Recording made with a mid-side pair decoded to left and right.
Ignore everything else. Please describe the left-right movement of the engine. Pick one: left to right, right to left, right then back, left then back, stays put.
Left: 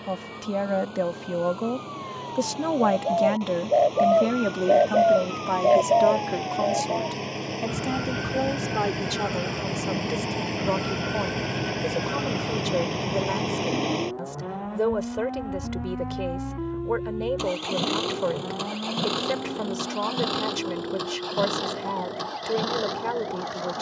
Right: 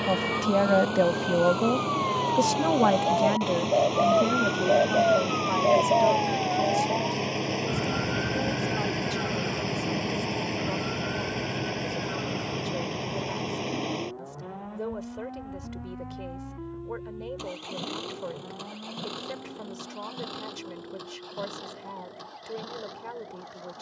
right to left.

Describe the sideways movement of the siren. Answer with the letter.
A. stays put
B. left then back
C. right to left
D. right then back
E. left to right
C.